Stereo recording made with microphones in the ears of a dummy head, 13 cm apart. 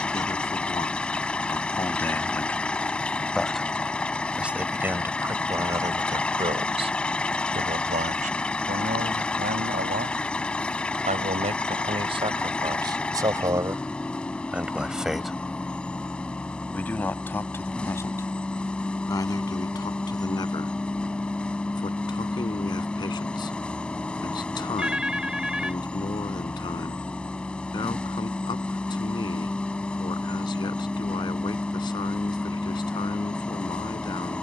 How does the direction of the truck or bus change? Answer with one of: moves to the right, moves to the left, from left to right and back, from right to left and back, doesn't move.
doesn't move.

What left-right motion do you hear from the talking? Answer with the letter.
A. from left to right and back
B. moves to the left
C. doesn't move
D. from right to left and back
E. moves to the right
A.